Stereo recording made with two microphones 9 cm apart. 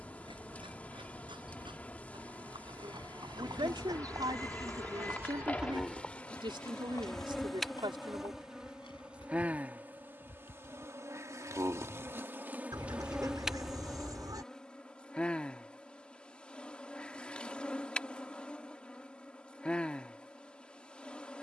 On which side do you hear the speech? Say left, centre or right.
right.